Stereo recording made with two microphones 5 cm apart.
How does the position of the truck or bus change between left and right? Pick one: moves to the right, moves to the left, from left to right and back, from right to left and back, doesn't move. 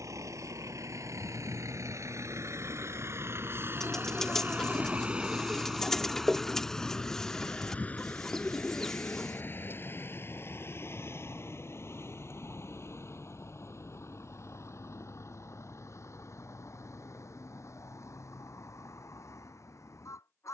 moves to the left.